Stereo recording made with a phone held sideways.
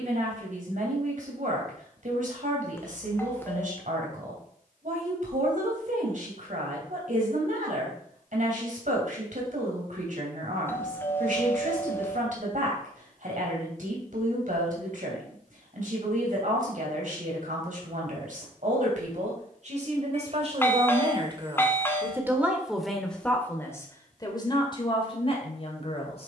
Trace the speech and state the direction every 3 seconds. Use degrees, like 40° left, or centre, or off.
60° right, 60° right, 60° right, 60° right, 60° right, 60° right, 50° right, 10° right, 40° left.